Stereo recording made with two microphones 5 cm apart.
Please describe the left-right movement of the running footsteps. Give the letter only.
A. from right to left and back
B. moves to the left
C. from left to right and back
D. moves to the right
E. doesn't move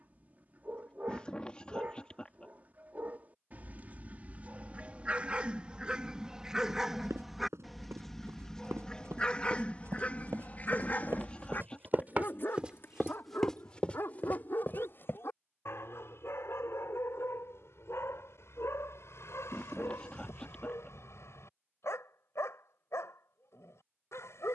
B.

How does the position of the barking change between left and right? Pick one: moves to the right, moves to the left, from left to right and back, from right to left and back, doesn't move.
moves to the left.